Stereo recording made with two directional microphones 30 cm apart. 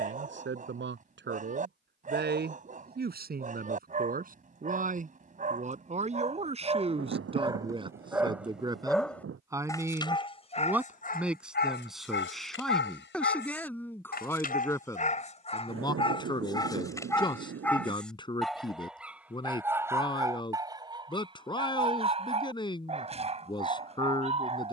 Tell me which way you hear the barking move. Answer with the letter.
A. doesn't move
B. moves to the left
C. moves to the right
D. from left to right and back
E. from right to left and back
E.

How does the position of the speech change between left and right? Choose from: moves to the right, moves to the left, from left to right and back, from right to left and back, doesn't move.
moves to the left.